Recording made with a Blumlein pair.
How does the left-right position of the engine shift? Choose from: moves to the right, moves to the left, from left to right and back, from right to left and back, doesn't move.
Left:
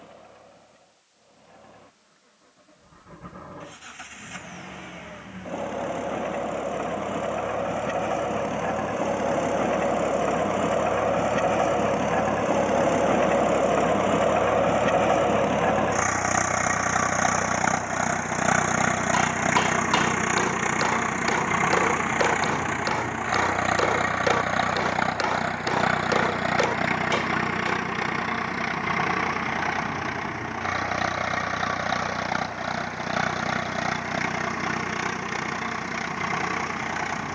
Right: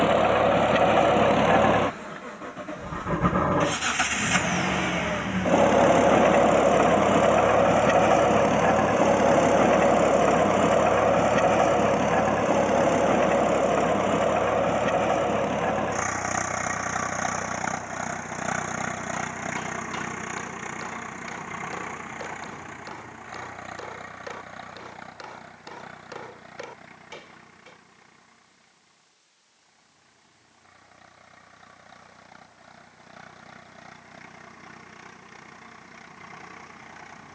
moves to the left.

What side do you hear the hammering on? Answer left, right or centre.
left.